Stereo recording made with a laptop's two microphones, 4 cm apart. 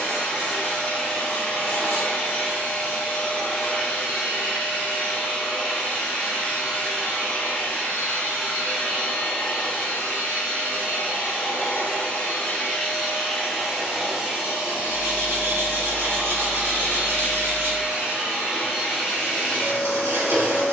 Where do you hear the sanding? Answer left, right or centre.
right.